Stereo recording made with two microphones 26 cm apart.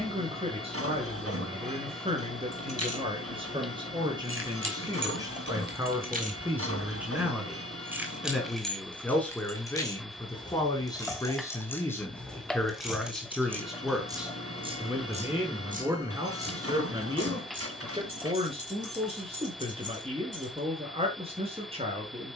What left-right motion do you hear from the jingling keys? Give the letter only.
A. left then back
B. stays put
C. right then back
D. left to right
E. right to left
A.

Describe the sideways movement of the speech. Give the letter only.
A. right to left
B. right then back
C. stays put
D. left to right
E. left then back
E.